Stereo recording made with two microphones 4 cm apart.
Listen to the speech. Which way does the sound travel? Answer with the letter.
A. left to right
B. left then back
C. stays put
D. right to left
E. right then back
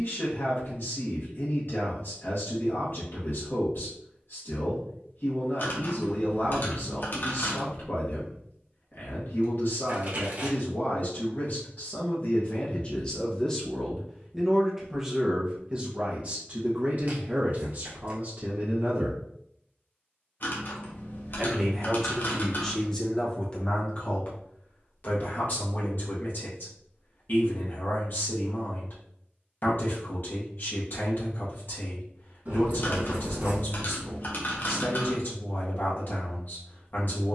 E.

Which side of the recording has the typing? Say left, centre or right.
left.